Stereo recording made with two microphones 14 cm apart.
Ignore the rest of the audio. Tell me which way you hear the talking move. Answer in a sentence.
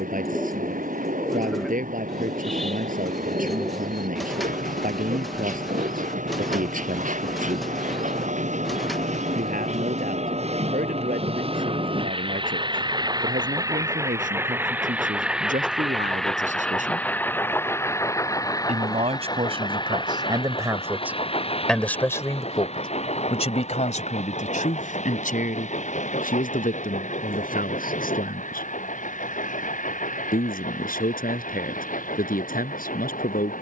In this clip you hear the talking move from right to left.